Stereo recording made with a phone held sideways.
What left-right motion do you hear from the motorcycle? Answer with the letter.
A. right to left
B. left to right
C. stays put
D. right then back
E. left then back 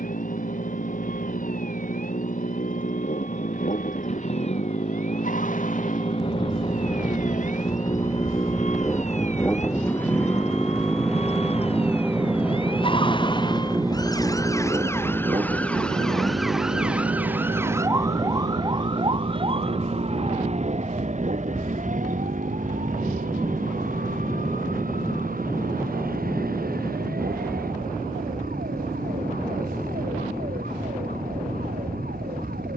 B.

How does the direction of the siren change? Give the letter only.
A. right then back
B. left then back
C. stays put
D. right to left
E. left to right
E.